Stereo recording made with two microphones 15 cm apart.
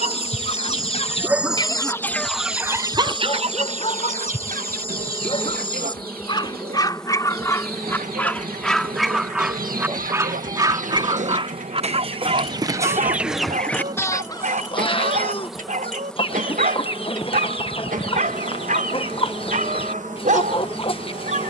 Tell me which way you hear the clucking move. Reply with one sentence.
In this clip you hear the clucking move from left to right and back again.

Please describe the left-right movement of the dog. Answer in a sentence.
You can hear the dog move from right to left and back again.